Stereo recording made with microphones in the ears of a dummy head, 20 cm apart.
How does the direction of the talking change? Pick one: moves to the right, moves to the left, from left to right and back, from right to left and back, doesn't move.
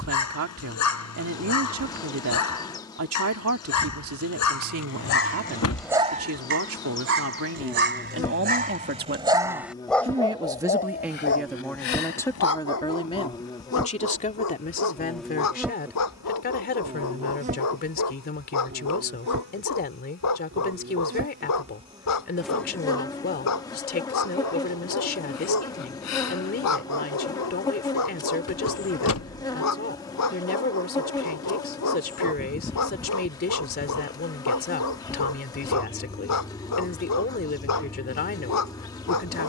moves to the left.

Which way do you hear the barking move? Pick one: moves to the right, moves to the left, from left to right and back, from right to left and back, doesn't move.
from left to right and back.